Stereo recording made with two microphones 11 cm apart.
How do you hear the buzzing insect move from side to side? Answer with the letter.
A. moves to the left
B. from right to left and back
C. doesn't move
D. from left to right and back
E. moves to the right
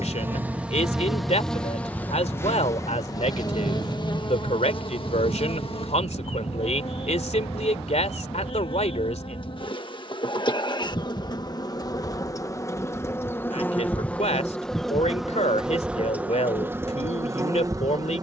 B.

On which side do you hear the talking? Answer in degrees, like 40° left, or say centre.
80° left.